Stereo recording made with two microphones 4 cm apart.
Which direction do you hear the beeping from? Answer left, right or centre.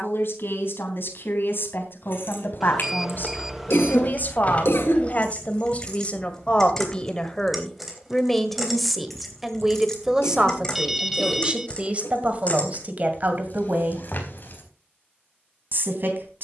centre.